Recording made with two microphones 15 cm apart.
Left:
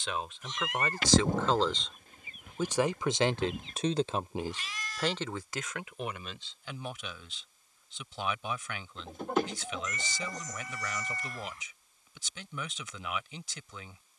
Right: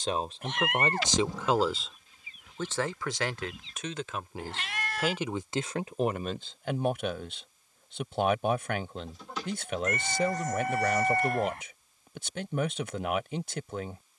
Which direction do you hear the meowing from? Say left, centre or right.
right.